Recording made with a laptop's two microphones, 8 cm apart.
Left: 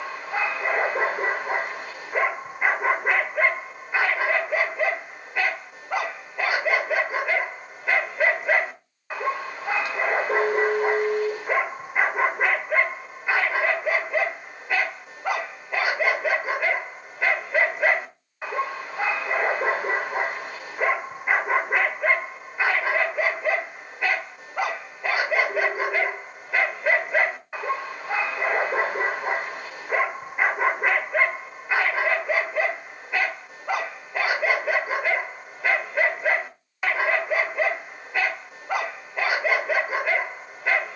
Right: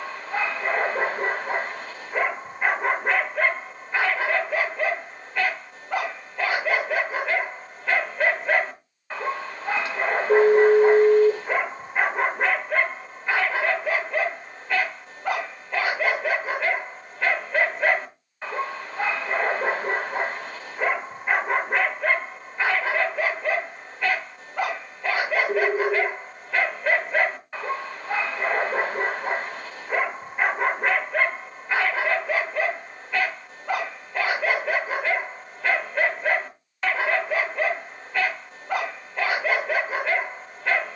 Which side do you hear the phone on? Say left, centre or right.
right.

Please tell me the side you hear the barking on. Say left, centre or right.
centre.